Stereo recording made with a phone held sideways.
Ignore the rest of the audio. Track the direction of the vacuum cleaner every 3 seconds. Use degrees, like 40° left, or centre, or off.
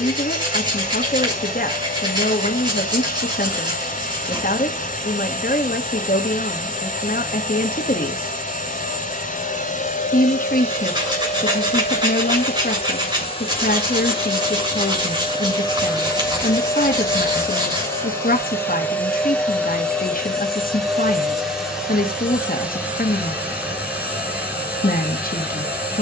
60° left, 60° left, 60° left, 50° left, 40° left, 20° left, 10° left, 10° right, 10° right.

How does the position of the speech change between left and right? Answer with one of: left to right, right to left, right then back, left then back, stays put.
stays put.